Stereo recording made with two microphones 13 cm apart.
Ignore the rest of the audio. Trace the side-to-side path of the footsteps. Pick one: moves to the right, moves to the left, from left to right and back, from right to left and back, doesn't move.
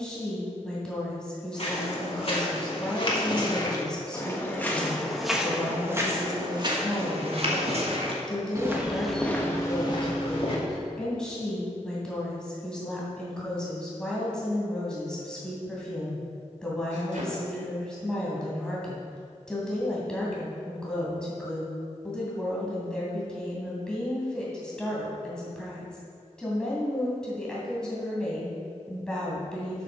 from left to right and back.